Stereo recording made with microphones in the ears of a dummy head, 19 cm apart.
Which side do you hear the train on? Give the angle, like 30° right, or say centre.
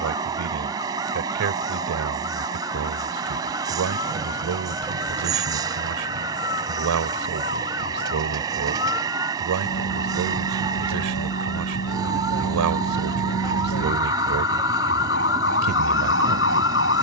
20° right.